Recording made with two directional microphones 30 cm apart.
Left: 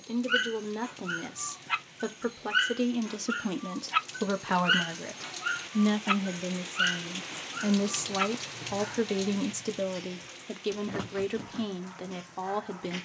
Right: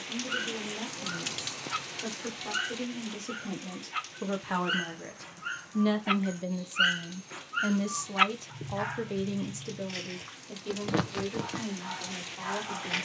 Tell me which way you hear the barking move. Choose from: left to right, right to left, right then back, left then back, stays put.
left to right.